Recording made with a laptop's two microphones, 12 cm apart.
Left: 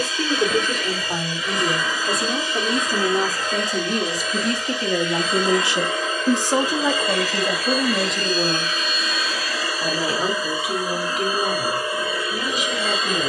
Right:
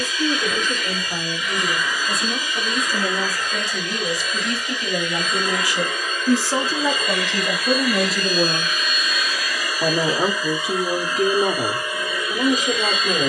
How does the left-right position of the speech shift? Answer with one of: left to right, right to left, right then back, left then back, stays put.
left to right.